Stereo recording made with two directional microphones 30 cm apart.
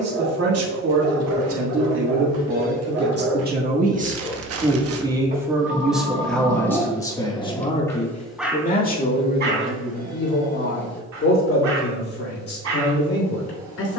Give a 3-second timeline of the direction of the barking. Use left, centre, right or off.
right, right, centre, right, right.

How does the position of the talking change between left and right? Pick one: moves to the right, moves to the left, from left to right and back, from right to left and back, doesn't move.
moves to the left.